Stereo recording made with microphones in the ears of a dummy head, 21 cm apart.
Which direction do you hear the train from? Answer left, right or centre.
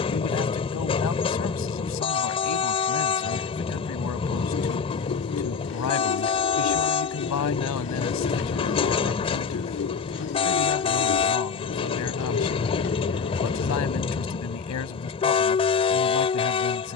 left.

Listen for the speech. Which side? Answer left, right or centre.
left.